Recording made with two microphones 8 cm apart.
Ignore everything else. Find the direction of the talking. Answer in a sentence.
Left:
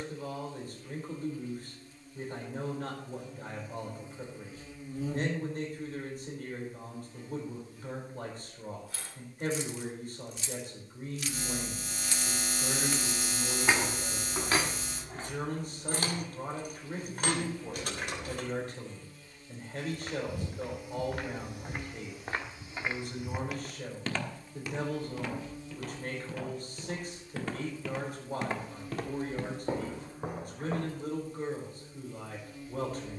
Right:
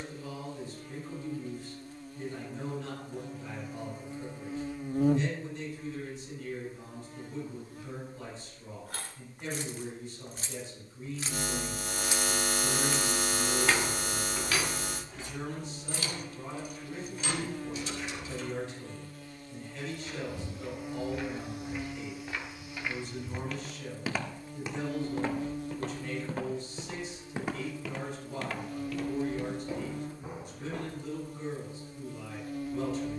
In this clip you hear the talking on the left.